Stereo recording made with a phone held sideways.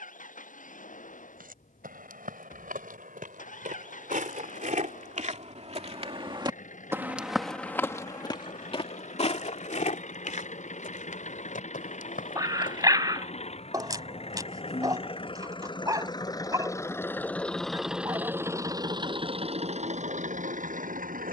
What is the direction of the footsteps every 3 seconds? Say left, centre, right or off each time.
right, right, centre, left, left, off, off.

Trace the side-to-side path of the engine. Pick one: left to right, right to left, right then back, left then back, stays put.
left to right.